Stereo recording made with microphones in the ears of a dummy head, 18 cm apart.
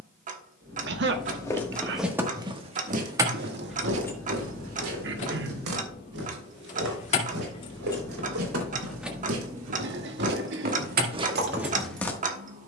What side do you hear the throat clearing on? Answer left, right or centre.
right.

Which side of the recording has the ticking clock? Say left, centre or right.
right.